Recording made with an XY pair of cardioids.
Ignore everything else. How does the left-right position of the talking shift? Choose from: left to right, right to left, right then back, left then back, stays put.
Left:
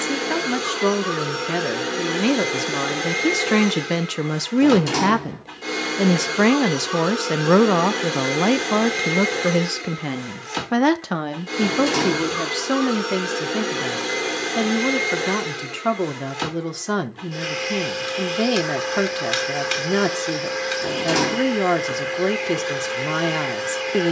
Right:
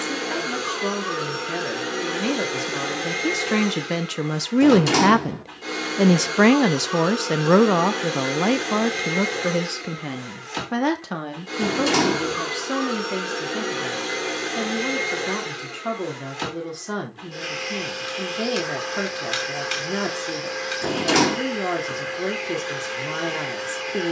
right then back.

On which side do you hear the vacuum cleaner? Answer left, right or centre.
left.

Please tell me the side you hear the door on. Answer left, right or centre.
right.